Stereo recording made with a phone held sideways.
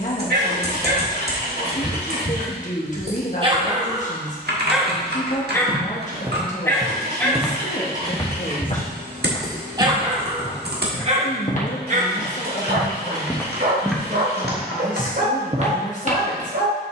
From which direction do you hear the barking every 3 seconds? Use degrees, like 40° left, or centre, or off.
60° right, 10° right, 10° left, 40° right, 60° right, 70° right.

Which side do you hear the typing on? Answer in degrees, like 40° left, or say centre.
70° right.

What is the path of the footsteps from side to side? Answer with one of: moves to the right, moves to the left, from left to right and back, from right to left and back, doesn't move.
from right to left and back.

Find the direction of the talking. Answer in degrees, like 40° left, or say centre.
50° left.